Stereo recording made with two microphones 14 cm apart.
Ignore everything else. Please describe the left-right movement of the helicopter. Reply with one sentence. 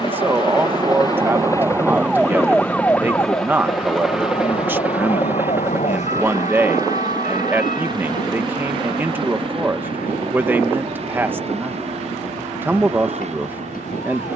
You can hear the helicopter go from the left side to the right.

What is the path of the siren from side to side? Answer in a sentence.
In this clip you hear the siren move to the left.